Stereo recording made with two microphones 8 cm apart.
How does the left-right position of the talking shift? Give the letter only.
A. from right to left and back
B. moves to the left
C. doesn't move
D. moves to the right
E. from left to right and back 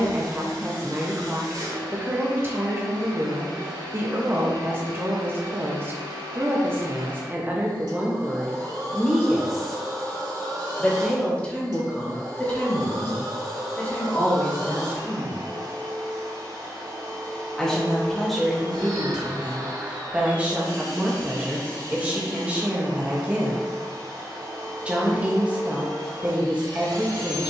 A.